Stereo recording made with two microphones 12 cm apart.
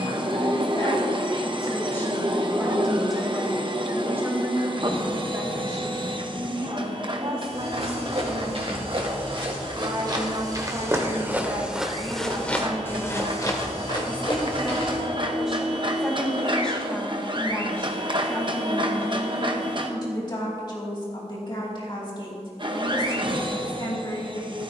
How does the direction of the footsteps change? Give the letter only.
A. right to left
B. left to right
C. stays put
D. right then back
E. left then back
A.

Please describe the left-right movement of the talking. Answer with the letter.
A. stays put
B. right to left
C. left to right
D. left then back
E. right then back
E.